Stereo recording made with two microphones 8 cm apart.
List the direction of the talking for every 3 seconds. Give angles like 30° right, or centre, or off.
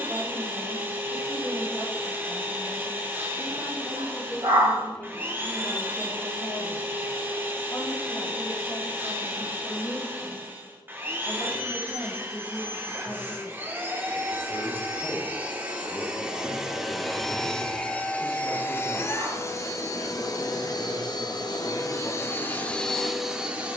30° right, 10° left, 40° left, 60° left, 60° left, 60° left, 60° left, 60° left.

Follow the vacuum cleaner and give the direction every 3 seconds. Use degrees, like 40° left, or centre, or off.
20° right, 20° right, 20° right, 20° right, 20° right, 10° right, 40° left, 20° left.